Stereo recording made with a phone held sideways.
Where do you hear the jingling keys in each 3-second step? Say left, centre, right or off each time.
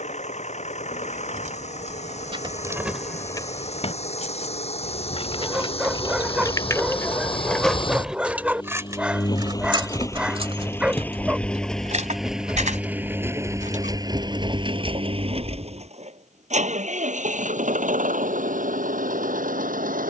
right, left, centre, right, right, off, off.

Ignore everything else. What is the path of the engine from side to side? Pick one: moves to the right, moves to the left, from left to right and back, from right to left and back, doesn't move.
moves to the right.